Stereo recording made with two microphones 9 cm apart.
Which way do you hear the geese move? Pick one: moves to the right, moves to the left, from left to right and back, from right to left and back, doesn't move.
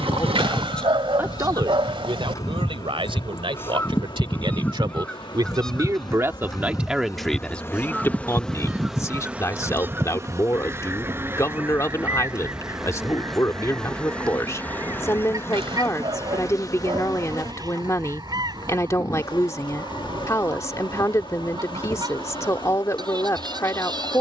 moves to the right.